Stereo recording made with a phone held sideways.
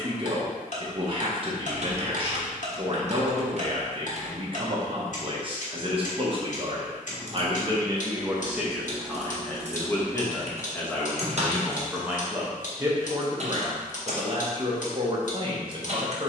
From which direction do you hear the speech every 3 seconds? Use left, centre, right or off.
right, right, right, centre, right, right.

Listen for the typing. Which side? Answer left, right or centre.
right.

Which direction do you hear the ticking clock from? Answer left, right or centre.
left.